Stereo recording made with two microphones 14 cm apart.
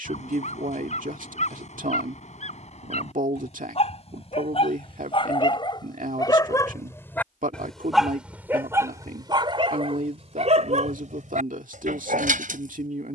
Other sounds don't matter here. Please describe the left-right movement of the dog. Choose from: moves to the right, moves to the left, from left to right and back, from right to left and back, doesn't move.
moves to the right.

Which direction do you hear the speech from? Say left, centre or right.
right.